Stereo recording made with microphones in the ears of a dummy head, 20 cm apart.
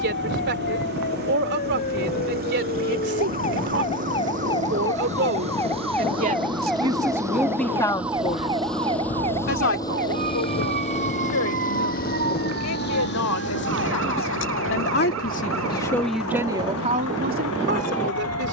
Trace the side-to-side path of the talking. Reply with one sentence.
In this clip you hear the talking go left and come back.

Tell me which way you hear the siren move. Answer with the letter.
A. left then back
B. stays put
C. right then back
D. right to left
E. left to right
E.